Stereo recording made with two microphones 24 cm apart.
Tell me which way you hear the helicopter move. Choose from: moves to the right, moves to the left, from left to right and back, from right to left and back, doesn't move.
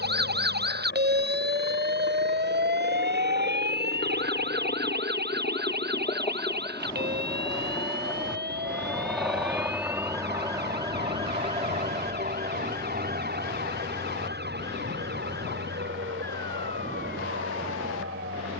moves to the right.